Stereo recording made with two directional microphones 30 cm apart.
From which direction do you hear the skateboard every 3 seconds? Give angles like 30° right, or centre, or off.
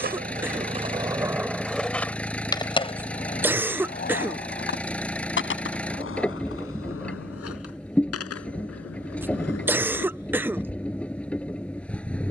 10° right, 30° left, 50° left, 60° left.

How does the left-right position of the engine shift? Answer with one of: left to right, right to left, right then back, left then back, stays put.
stays put.